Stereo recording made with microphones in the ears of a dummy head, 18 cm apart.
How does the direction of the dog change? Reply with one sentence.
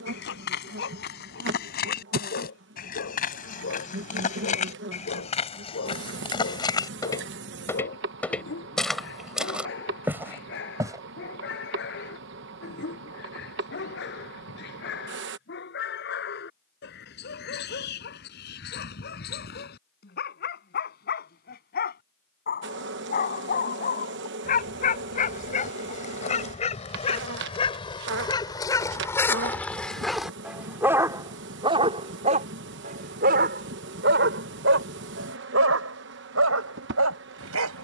You can hear the dog move to the right.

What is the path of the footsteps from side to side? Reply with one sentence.
You can hear the footsteps move from left to right.